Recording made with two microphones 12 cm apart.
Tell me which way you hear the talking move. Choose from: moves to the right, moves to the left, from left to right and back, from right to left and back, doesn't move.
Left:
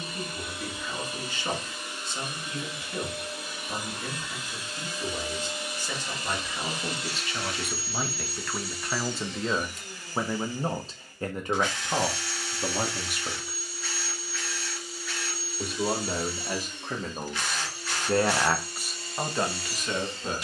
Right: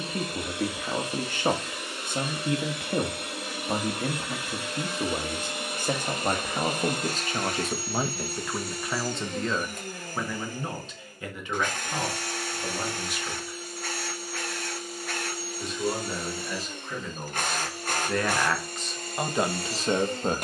from right to left and back.